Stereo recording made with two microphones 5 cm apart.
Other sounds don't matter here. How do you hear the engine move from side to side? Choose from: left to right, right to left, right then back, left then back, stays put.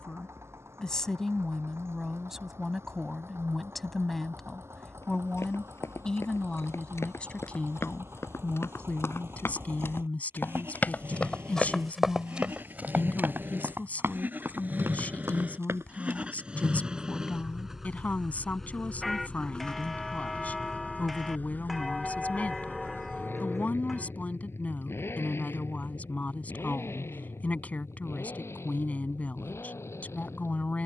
right to left.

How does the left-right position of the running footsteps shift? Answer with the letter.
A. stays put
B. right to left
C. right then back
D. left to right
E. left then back
D.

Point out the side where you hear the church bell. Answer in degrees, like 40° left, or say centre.
centre.